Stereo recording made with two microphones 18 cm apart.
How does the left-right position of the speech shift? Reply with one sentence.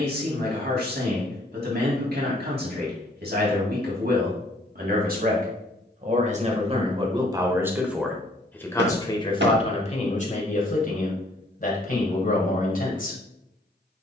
You can hear the speech move to the left.